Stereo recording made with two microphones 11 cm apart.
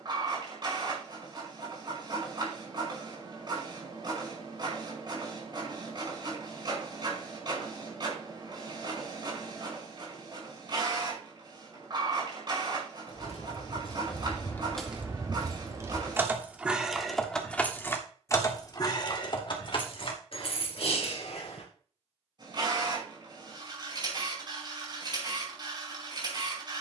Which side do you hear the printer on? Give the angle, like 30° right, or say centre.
40° right.